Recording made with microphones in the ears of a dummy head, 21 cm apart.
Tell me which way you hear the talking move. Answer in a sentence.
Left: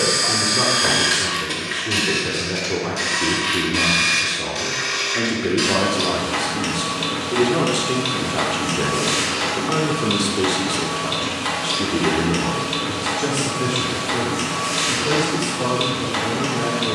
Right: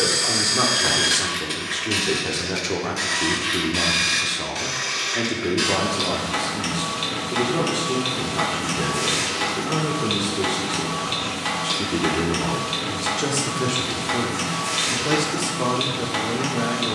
You can hear the talking go left and come back.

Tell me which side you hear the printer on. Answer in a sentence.
You can hear the printer in the centre.